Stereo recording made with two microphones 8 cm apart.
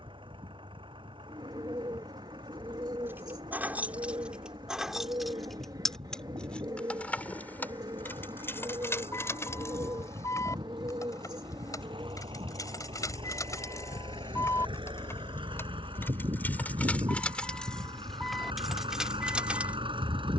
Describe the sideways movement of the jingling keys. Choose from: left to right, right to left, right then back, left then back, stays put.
left then back.